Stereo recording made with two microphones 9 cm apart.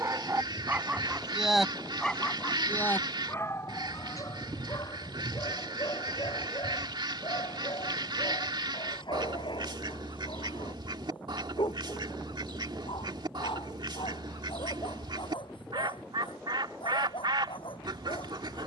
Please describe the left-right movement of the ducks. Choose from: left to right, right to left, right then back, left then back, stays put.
stays put.